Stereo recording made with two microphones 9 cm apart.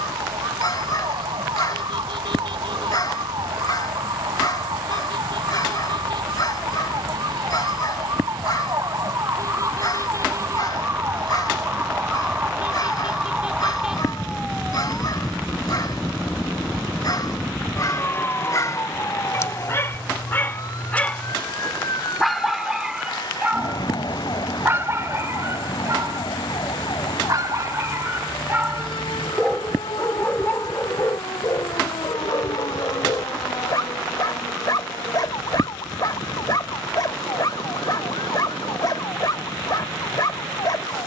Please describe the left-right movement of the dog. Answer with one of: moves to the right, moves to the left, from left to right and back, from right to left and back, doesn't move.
from left to right and back.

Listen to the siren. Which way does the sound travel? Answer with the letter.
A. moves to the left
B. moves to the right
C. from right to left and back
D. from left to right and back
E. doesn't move
A.